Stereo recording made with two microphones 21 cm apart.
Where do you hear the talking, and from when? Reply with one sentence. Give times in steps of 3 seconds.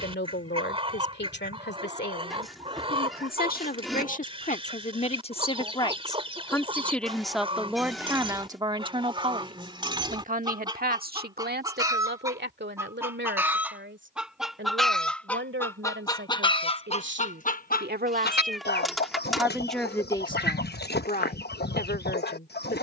You can hear the talking on the left from 0 s, in the centre from 6 s, on the right from 9 s, in the centre from 18 s and on the left from 21 s.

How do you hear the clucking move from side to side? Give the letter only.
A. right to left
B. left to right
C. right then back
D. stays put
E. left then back
A.